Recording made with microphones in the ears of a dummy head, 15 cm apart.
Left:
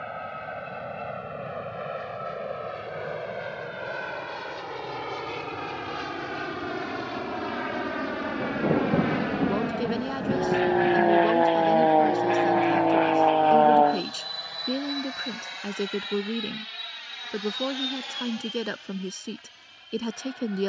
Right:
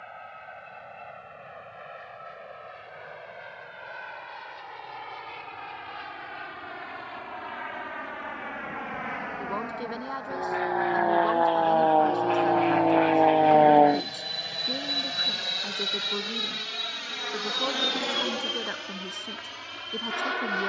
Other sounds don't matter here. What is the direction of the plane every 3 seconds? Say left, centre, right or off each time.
left, left, left, left, centre, right, right.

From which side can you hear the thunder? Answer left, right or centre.
left.